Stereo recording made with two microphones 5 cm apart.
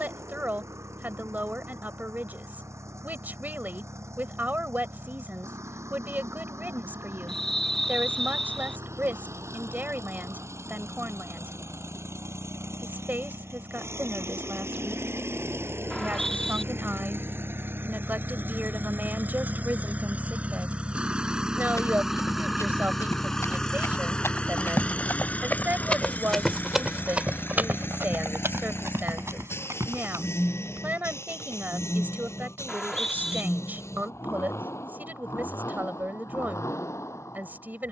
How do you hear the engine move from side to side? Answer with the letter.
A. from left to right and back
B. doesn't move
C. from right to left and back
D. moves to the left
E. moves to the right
D.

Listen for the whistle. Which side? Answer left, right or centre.
centre.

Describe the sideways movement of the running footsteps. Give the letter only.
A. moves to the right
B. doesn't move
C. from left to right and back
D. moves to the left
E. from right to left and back
A.